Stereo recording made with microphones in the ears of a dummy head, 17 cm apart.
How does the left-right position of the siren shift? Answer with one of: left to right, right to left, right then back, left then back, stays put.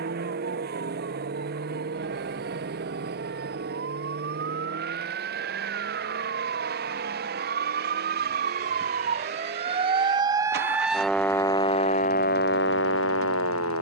right to left.